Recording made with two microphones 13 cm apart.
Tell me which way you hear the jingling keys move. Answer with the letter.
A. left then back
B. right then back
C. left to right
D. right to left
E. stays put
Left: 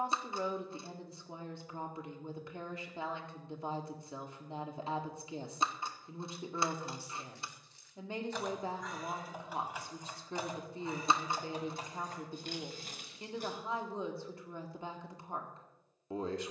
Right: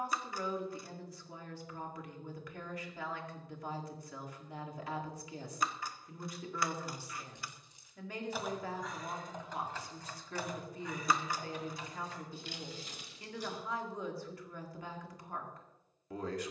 D.